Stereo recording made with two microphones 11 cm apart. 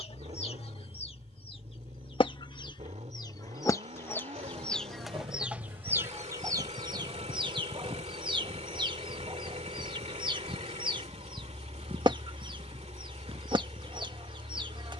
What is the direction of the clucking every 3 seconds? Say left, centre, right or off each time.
left, centre, right, right, right.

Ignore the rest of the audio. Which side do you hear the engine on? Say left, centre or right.
right.